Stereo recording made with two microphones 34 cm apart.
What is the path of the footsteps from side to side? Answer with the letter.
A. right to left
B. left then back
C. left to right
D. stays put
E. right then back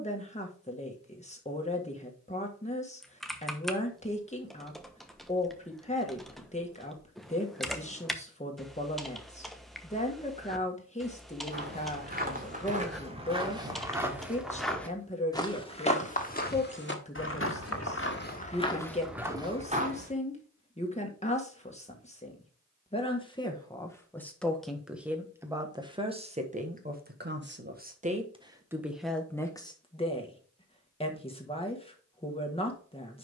B.